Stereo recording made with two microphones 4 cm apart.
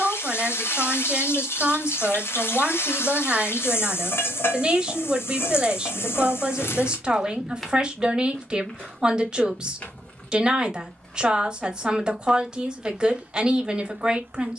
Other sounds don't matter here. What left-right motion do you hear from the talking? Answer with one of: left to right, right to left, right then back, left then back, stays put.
stays put.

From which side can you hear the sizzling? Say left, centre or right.
left.